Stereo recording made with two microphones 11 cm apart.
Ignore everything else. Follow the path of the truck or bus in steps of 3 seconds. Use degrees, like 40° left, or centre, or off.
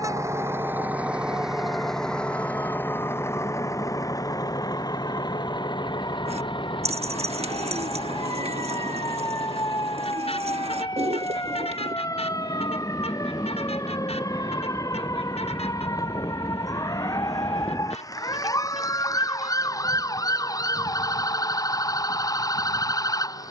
centre, 30° left, 50° left, 60° left, 60° left, 70° left, 70° left, 70° left.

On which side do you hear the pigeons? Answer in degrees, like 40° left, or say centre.
70° right.